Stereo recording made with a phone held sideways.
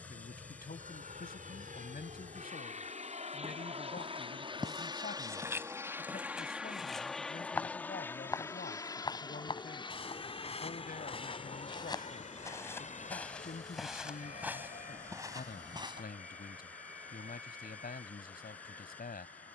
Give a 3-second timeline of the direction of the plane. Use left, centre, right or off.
right, right, centre, left, left, left, left.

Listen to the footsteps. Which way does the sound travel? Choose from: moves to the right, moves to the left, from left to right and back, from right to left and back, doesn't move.
from right to left and back.